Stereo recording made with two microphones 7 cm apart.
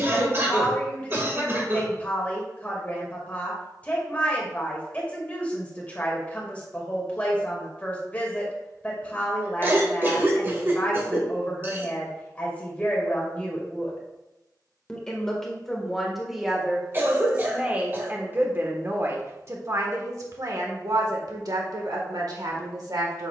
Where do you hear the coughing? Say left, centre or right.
right.